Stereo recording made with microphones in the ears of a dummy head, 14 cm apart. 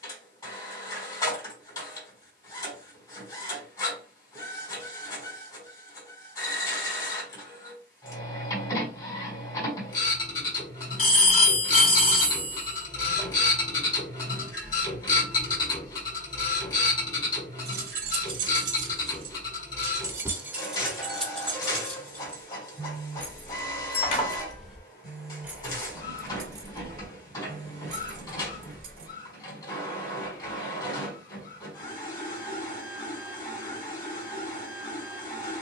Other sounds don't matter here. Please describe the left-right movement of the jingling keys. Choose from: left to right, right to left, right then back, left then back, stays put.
left then back.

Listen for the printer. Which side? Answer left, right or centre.
left.